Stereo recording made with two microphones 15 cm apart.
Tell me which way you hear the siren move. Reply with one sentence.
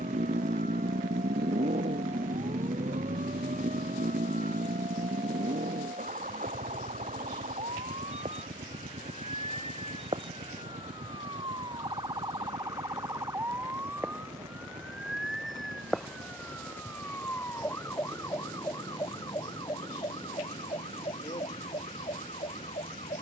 You can hear the siren move from right to left.